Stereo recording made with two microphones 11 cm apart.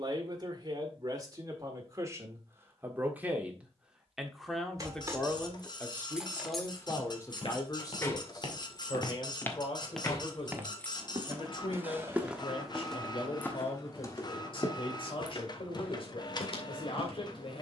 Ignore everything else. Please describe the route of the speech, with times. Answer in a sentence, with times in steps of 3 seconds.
You can hear the speech on the right from 0 s, in the centre from 3 s and on the left from 6 s.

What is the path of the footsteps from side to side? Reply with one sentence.
In this clip you hear the footsteps go right and come back.